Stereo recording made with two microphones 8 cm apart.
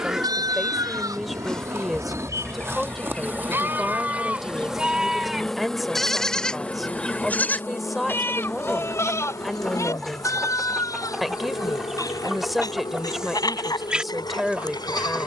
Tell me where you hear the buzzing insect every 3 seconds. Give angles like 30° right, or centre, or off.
40° right, 10° right, 30° left, 50° left, 70° left.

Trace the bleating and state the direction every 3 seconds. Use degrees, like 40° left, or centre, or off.
50° right, 20° right, 20° left, 40° left, 50° left.